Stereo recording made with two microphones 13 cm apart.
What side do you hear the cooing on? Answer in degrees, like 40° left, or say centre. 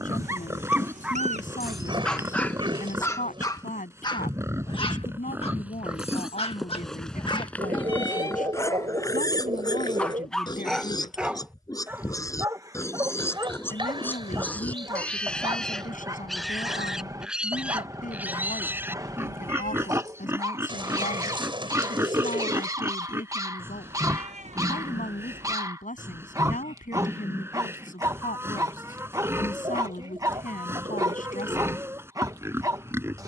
40° right.